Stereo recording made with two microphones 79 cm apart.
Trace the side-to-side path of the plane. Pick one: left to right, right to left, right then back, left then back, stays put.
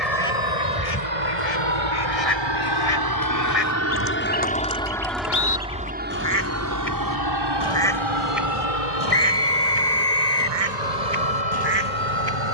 left to right.